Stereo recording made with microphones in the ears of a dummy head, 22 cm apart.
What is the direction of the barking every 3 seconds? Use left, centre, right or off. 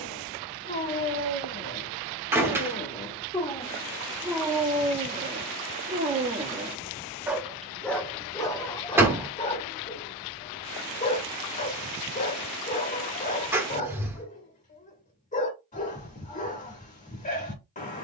left, centre, centre, left, left, left.